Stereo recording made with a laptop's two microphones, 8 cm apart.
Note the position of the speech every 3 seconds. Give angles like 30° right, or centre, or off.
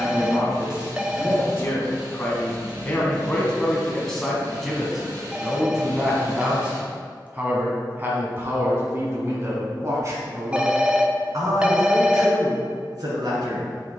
30° left, centre, 20° right, 40° right, 60° right.